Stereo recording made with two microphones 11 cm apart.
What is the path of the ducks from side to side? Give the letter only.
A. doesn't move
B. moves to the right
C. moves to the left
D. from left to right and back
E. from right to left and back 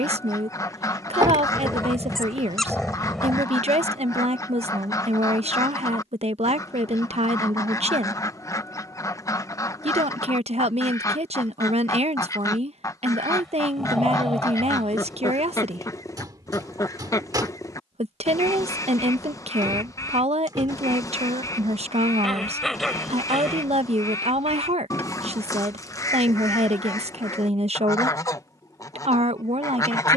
A.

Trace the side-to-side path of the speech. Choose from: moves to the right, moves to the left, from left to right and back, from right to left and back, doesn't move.
doesn't move.